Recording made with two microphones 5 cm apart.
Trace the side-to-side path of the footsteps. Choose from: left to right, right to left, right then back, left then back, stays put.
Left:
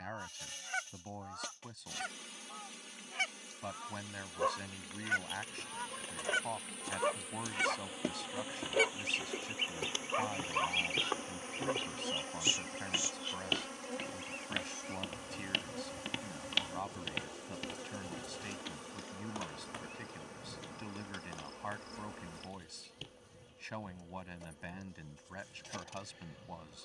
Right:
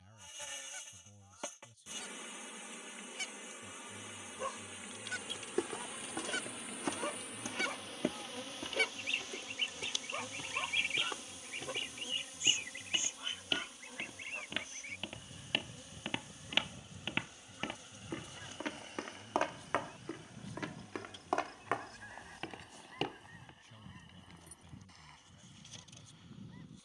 left then back.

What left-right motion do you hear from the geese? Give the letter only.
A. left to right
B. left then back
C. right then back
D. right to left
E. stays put
A.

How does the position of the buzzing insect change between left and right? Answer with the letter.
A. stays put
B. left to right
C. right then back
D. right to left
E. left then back
D.